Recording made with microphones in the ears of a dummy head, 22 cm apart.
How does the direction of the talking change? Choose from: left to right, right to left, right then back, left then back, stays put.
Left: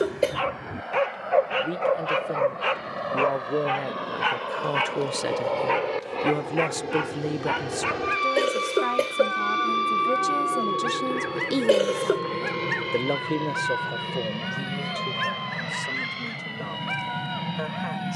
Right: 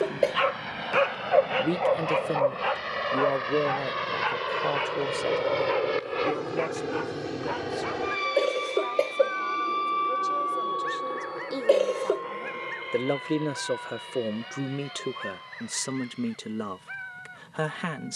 left then back.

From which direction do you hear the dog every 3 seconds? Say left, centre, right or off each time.
centre, left, left, left, left, left.